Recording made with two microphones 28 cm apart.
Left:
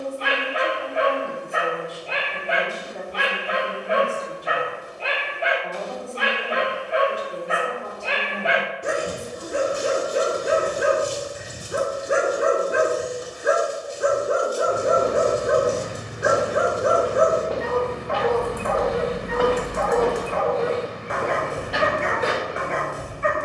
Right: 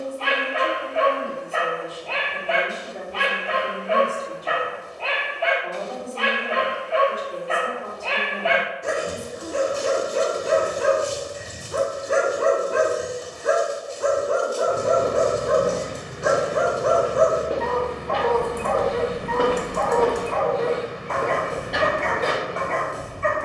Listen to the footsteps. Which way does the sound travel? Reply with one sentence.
You can hear the footsteps go right and come back.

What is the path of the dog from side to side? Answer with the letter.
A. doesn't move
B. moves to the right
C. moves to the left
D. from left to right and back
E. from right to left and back
A.